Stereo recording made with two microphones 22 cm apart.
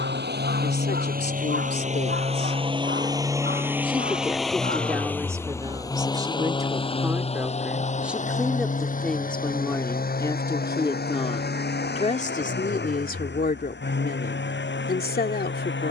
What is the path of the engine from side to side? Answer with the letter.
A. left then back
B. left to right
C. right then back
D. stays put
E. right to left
E.